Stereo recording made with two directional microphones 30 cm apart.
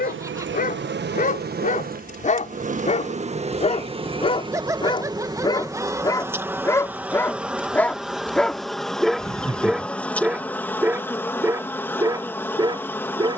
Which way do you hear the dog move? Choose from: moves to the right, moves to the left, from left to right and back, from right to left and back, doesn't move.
moves to the right.